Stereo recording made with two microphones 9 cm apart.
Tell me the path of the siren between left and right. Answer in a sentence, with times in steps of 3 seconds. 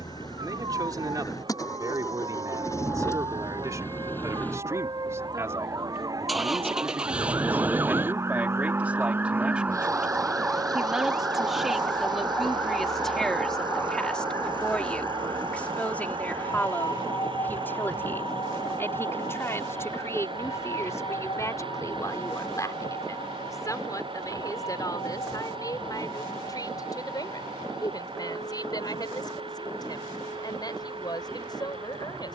In this clip you hear the siren on the right from 0 s, in the centre from 9 s and on the left from 12 s.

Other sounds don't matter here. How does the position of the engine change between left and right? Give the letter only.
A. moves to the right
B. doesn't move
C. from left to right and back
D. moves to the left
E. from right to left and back
A.